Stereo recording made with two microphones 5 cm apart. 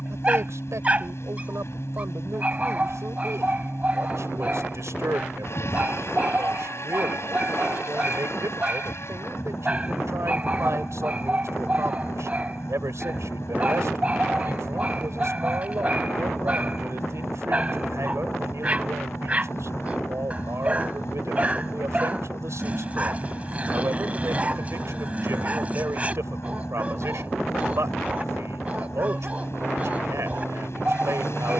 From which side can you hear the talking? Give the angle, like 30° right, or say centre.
80° right.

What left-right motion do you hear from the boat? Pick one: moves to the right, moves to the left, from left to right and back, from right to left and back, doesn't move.
doesn't move.